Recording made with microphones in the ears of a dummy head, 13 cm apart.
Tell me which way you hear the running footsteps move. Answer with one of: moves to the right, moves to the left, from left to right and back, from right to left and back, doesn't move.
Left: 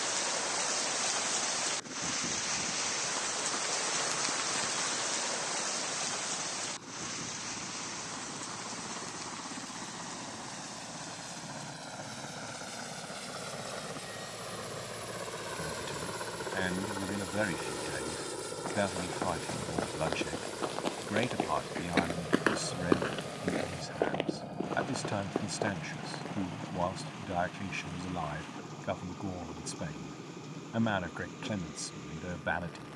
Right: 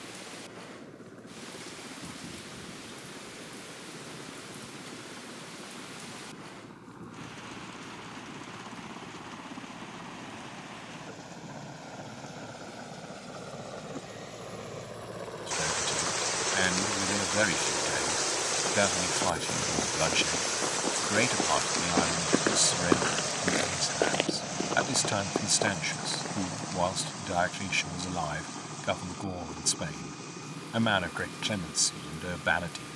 moves to the right.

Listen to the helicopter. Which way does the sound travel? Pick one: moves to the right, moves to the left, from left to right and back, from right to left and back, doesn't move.
moves to the right.